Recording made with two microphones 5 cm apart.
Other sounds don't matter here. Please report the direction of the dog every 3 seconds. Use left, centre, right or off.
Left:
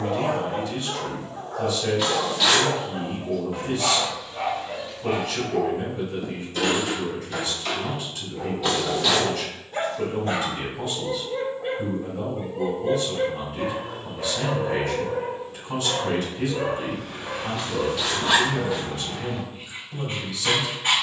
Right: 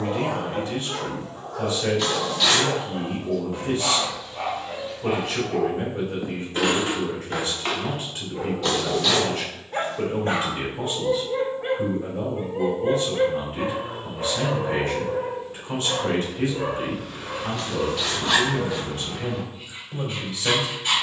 left, centre, right, right, right, left, left.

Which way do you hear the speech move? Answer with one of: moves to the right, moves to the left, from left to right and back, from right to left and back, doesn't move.
doesn't move.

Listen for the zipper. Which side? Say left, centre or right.
centre.